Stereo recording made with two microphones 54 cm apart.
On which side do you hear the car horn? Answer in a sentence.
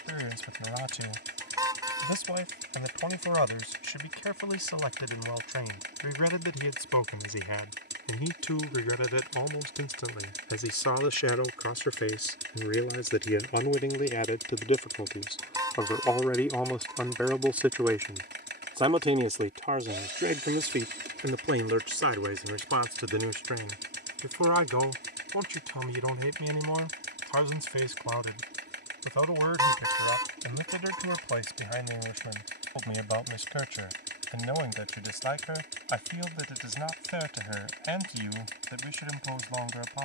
You can hear the car horn in the centre.